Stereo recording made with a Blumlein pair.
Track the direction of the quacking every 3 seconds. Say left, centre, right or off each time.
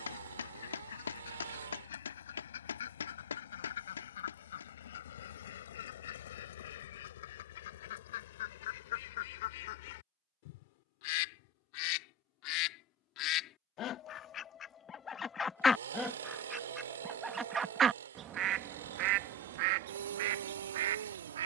left, left, left, left, left, centre, right.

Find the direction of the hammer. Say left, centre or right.
left.